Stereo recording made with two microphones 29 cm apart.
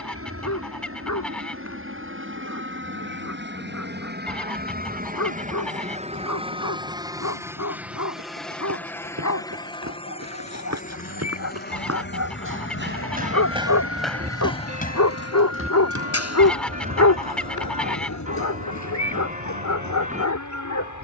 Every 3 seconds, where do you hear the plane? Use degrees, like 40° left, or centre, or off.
50° right, 30° right, 10° right, 20° left, 50° left, 60° left, 70° left.